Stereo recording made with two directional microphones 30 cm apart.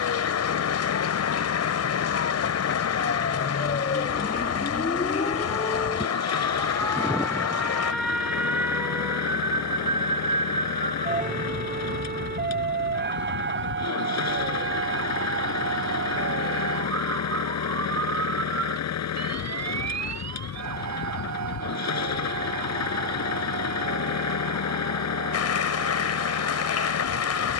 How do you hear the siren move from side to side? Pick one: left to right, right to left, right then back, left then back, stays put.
left to right.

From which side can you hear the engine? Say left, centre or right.
left.